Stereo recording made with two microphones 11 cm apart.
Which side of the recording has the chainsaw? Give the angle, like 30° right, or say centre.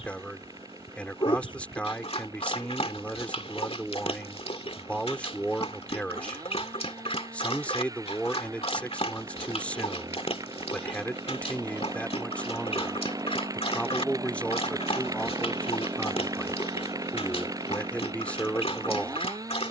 30° right.